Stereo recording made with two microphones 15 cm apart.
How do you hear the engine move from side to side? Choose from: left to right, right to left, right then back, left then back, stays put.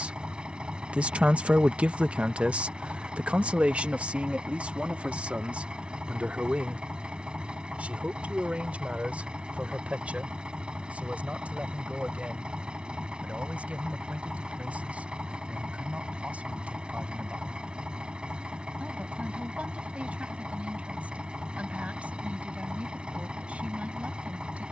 stays put.